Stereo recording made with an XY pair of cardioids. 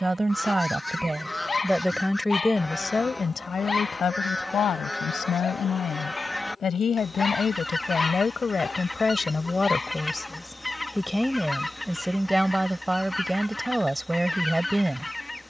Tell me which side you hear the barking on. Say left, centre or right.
left.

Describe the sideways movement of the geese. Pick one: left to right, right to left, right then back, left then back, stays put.
stays put.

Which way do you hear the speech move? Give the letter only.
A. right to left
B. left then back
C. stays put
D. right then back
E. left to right
B.